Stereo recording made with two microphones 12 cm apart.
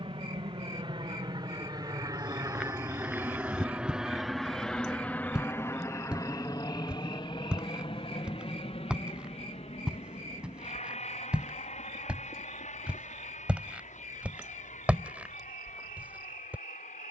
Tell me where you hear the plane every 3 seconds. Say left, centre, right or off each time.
right, centre, left, left, left, left.